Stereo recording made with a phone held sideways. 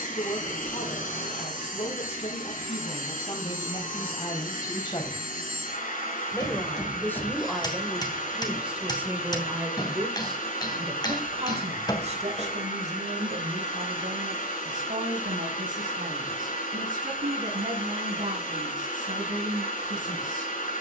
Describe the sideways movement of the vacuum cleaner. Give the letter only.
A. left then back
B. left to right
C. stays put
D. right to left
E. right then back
C.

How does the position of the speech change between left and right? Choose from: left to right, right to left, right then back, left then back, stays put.
left to right.